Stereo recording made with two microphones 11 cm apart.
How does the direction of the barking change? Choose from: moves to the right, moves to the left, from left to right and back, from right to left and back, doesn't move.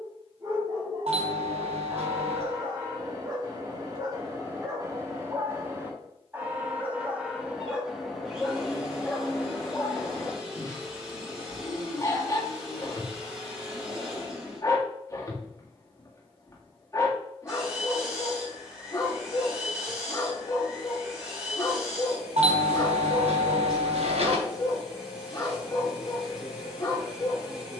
moves to the left.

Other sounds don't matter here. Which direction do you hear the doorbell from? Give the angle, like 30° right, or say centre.
70° right.